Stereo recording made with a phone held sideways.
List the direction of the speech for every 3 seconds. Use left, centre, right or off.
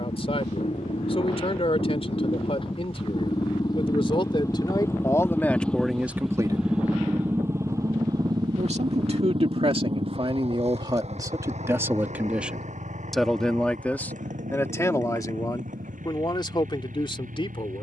left, left, right, right, centre, left.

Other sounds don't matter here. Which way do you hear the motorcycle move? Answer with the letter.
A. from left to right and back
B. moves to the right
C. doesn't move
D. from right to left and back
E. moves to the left
B.